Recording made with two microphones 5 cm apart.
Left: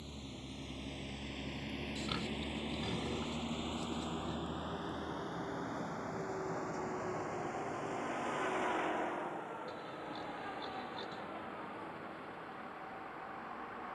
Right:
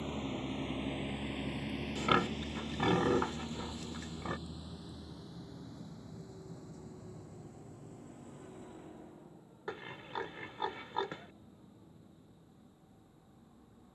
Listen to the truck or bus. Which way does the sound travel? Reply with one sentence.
In this clip you hear the truck or bus move from right to left.